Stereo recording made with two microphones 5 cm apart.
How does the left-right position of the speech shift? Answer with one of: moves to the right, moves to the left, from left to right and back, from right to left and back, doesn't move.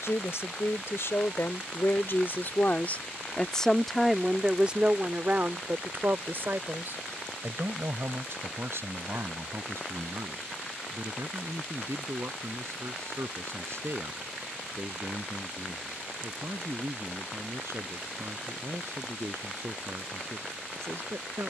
moves to the right.